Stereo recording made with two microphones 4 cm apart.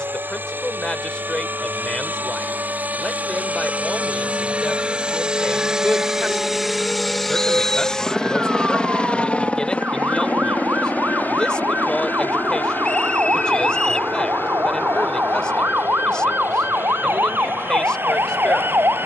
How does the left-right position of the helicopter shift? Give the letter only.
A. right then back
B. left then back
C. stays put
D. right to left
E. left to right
D.